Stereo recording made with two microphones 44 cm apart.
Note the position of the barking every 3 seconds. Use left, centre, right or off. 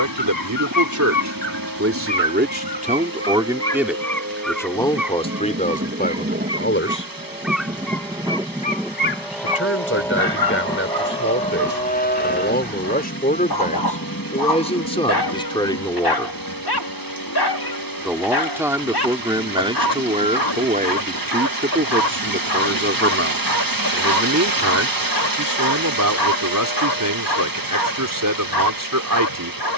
left, centre, centre, left, left, left, left, left, left, left.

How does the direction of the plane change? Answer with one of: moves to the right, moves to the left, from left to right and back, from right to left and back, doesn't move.
moves to the left.